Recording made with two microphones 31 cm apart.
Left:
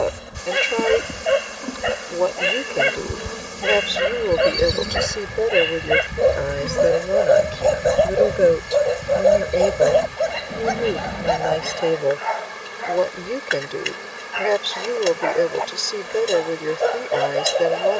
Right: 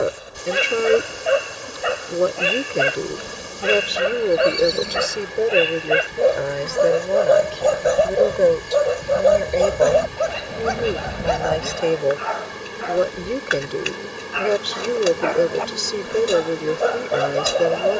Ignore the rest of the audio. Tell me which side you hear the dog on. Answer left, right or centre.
centre.